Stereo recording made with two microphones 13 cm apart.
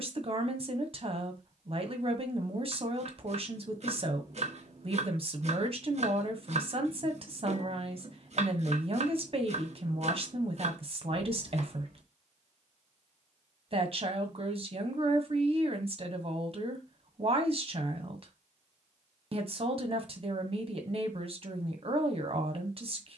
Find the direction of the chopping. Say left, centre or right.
right.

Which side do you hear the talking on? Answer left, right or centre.
right.